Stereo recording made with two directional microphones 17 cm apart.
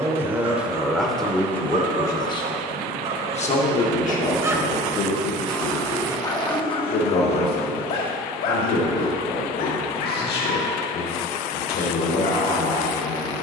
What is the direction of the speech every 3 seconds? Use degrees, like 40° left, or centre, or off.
centre, 50° left, 70° left, 70° left, 70° left.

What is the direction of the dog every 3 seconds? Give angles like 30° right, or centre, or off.
50° right, 20° right, 40° left, 60° left, 70° left.